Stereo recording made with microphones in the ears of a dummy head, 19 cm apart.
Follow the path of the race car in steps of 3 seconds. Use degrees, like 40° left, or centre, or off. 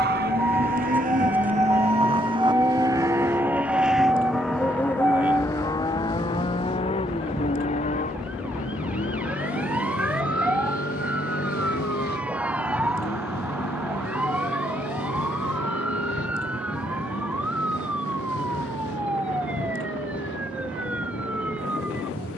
40° right, centre, 30° left, 40° left, 50° left, 60° left, 60° left, 60° left.